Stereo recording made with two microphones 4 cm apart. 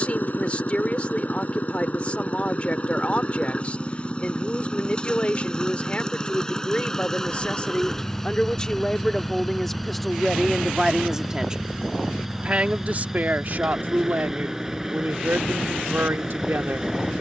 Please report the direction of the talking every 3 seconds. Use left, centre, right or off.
left, left, left, centre, right, right.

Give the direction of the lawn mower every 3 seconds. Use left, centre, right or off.
left, left, centre, centre, centre, centre.